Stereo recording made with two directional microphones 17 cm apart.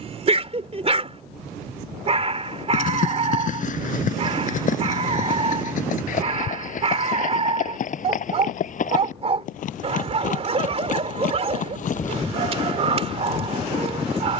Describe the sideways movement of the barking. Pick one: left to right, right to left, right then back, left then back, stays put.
stays put.